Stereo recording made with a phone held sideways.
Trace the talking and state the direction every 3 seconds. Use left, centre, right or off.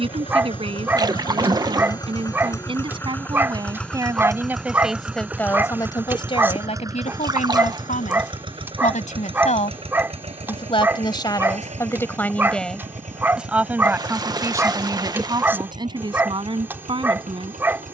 right, centre, left, left, centre, right.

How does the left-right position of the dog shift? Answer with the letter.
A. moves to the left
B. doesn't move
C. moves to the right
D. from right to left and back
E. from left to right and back
B.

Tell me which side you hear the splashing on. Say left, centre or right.
right.